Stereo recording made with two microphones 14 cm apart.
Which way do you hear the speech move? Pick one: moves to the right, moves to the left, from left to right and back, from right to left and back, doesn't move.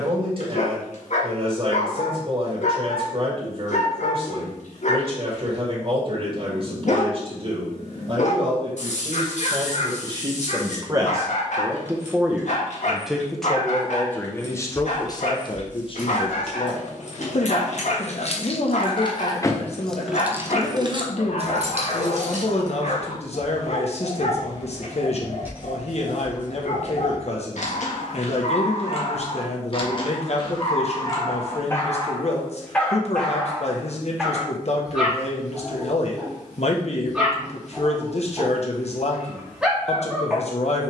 moves to the left.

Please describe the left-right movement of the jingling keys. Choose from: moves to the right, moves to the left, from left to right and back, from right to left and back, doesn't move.
moves to the right.